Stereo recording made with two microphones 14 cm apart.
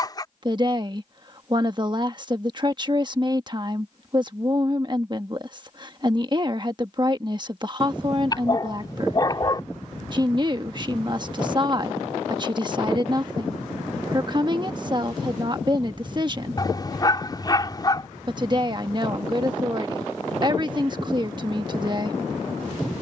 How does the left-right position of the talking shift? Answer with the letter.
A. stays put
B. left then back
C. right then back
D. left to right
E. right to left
A.